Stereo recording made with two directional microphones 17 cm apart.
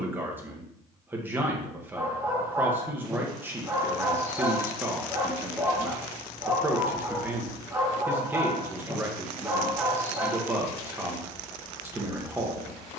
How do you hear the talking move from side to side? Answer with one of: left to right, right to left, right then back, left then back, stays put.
stays put.